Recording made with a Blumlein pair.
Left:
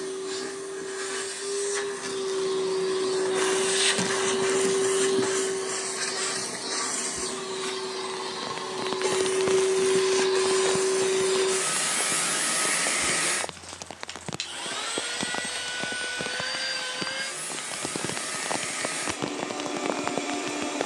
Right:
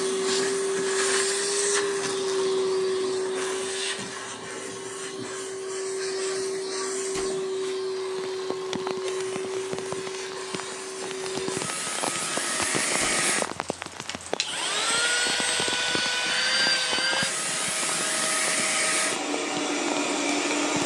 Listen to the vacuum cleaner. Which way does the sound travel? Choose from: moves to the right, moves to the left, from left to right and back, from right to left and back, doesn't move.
from right to left and back.